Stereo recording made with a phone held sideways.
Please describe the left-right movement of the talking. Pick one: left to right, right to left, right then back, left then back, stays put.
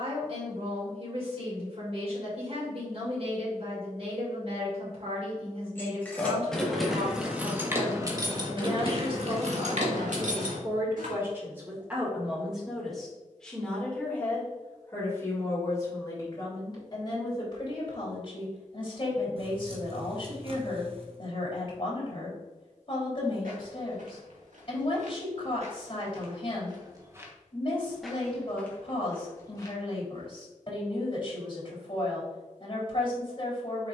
right to left.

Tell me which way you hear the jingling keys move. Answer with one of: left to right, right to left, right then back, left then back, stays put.
left to right.